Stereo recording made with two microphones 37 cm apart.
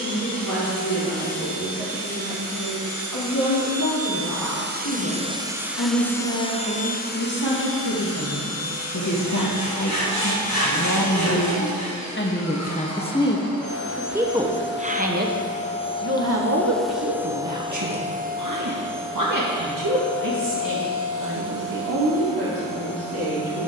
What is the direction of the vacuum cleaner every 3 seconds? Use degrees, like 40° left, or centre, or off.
70° right, 30° right, 30° left, 50° left, 40° left, 10° left, 40° right, 60° right.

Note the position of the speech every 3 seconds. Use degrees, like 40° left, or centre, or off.
80° left, 80° left, 70° left, 50° left, 10° left, 40° right, 60° right, 70° right.